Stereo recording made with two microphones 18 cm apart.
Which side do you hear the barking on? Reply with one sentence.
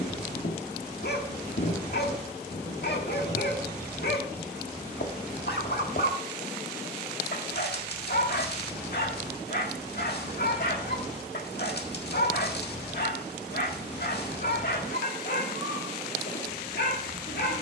You can hear the barking on the left.